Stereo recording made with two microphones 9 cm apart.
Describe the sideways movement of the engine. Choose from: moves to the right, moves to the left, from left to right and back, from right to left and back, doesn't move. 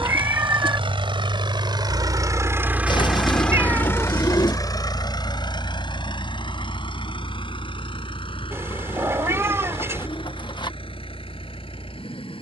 moves to the left.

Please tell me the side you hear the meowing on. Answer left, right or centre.
right.